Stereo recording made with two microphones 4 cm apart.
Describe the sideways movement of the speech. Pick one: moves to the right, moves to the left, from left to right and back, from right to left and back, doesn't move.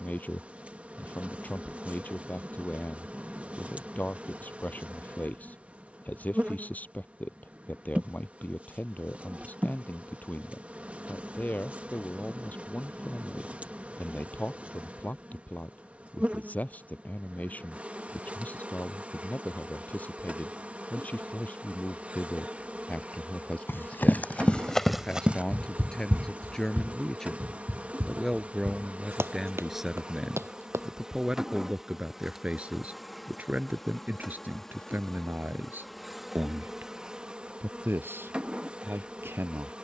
moves to the right.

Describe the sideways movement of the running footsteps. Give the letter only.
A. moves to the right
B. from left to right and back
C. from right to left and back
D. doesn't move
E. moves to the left
A.